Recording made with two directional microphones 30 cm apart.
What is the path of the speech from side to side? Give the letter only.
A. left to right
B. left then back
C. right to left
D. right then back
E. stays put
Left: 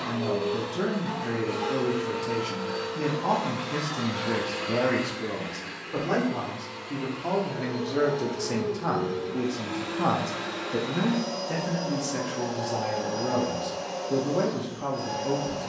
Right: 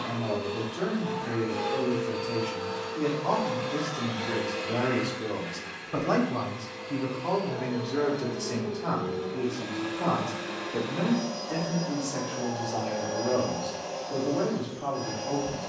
D.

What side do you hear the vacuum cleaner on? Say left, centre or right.
left.